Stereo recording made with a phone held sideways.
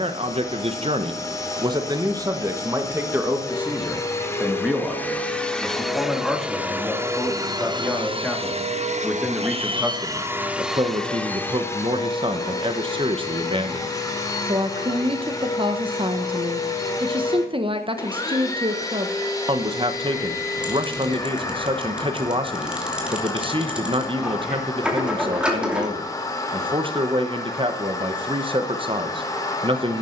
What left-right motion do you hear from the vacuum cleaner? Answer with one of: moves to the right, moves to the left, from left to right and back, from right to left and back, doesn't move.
from left to right and back.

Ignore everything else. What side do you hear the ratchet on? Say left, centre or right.
centre.